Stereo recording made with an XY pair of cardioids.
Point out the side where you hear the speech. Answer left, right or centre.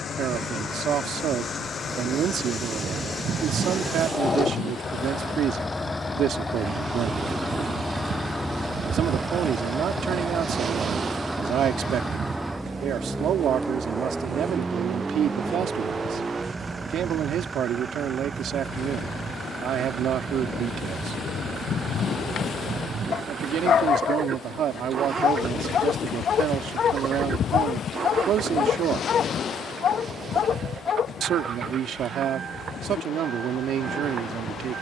right.